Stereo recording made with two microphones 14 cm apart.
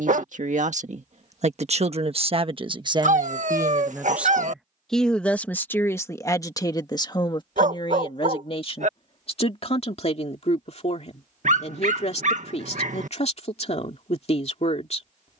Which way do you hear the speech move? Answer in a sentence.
You can hear the speech travel towards the left.